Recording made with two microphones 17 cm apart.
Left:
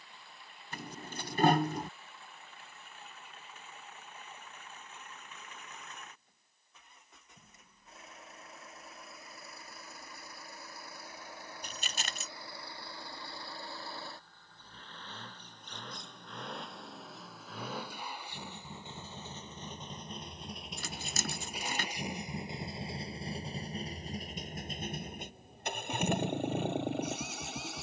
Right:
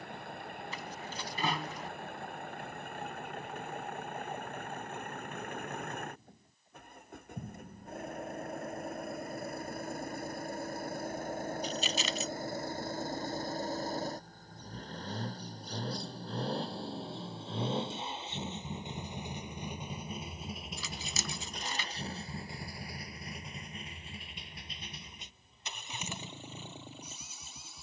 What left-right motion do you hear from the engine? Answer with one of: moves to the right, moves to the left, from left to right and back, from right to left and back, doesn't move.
moves to the left.